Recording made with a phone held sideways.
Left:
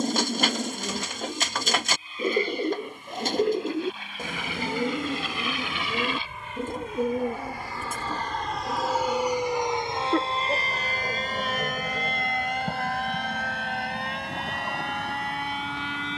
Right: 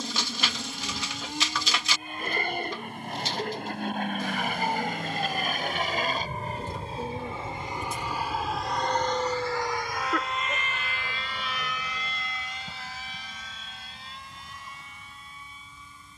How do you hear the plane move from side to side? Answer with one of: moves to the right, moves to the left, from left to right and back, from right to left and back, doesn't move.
moves to the left.